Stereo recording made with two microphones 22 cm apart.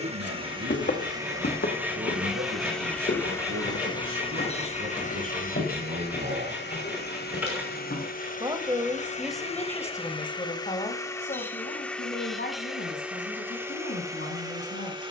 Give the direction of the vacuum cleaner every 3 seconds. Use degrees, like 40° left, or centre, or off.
10° right, 30° left, 40° left, 20° left, 10° right.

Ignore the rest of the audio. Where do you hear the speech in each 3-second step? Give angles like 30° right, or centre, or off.
80° right, 70° right, 40° right, 20° left, 50° left.